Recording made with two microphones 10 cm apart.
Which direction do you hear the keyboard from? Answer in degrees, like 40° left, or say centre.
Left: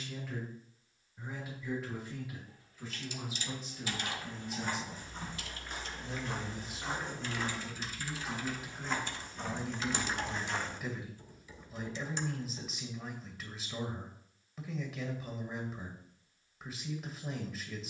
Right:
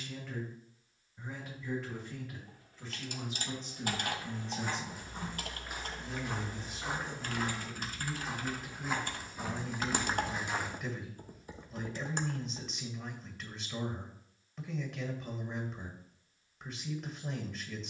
50° right.